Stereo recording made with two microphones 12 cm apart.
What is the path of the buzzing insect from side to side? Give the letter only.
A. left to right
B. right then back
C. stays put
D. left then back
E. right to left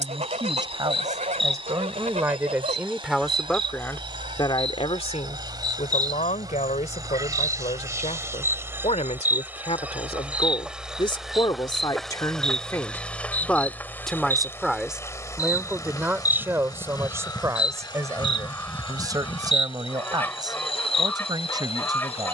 E.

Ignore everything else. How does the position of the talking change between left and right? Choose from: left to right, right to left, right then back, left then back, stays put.
left then back.